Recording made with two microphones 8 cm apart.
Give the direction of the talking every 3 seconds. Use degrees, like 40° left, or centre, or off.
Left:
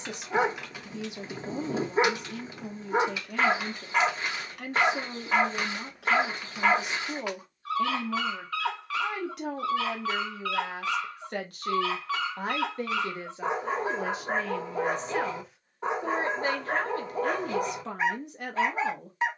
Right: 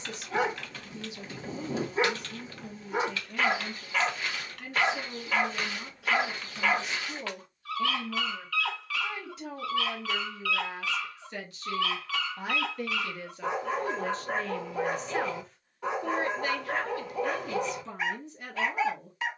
60° left, 60° left, 60° left, 60° left, 20° left, 30° left, 60° left.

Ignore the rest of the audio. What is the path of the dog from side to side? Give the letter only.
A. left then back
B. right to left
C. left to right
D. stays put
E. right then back
D.